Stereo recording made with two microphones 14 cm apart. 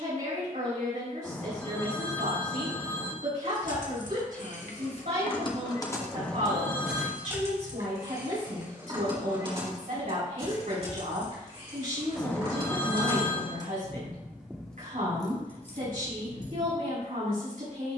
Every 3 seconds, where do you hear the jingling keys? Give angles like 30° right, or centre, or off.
off, 50° left, 20° right, 40° right, 20° right, 50° left.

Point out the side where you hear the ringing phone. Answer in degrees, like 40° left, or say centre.
20° left.